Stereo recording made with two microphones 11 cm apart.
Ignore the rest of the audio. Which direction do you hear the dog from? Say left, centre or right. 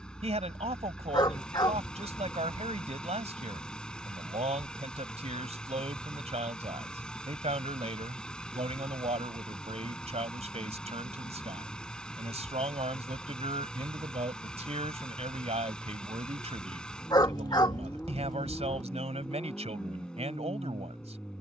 left.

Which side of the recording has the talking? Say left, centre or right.
right.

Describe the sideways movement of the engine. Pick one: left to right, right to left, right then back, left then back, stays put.
stays put.